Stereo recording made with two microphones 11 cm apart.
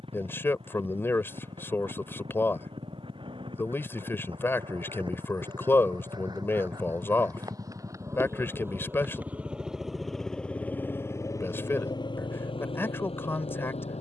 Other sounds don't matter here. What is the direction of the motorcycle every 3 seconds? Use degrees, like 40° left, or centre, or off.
60° right, 50° right, 30° right, 10° left, 60° left.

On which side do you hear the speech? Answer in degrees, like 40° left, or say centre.
20° left.